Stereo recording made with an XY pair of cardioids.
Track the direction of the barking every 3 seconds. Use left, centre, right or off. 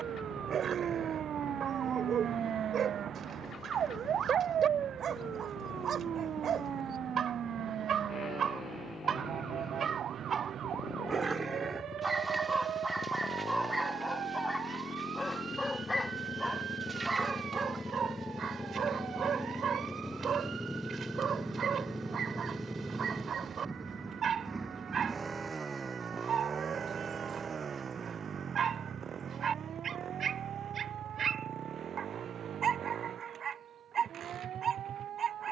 right, right, right, right, centre, centre, right, right, right, right, right, right.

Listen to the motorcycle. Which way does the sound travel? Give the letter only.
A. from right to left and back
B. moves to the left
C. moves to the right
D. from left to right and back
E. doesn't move
C.